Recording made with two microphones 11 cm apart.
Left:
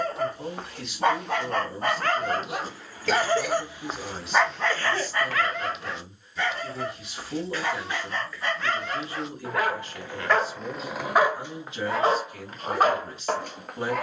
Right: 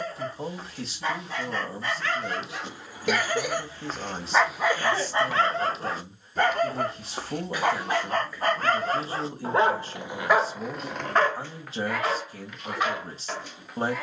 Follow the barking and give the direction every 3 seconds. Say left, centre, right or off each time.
left, centre, right, centre, left.